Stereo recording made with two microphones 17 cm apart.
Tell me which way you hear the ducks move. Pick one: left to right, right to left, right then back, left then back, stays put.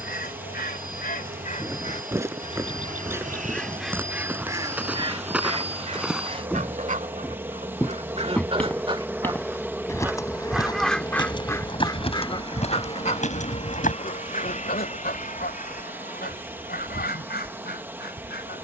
right then back.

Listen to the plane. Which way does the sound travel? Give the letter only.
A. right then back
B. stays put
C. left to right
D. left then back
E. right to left
E.